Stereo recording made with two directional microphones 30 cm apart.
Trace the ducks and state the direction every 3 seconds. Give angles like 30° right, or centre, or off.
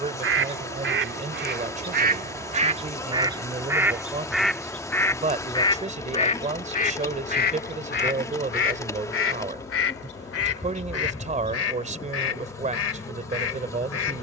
30° right, centre, 30° left, 50° left, 50° left.